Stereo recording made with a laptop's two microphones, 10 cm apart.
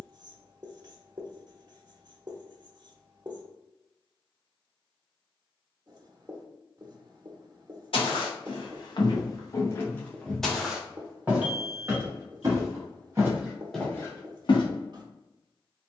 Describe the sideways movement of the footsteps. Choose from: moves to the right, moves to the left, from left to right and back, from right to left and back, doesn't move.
from left to right and back.